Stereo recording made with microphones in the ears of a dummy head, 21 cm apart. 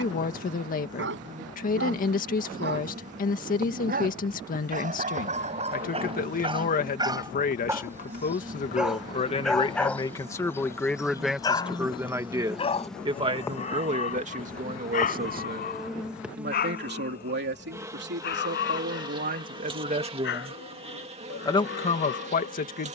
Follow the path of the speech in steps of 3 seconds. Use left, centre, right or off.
left, left, left, centre, right, right, right, left.